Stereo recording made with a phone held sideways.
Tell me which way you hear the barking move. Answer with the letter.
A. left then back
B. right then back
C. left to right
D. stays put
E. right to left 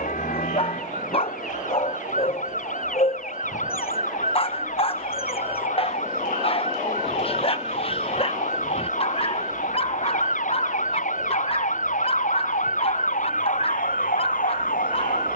D.